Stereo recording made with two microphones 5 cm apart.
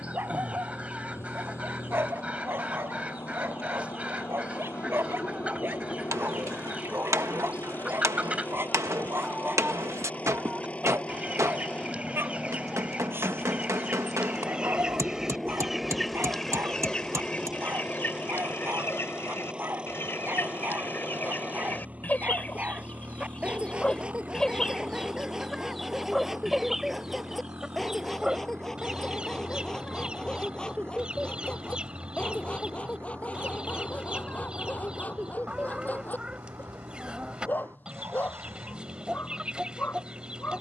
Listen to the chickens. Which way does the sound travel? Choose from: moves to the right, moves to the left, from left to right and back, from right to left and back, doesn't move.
from right to left and back.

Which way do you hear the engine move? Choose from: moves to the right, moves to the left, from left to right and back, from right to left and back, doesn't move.
moves to the right.